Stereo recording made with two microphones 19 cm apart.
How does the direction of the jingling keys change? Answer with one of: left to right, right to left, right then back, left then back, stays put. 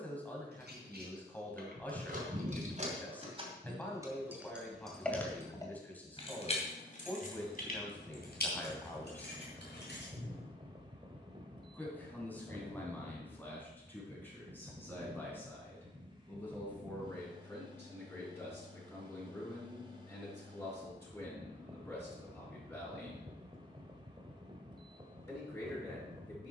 right to left.